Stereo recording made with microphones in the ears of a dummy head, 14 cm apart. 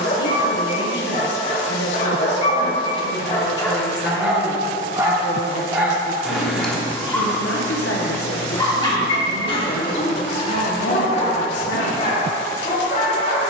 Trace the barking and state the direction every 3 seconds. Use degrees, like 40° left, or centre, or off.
50° left, centre, 10° left, 40° left, 50° left.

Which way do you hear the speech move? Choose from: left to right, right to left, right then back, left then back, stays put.
stays put.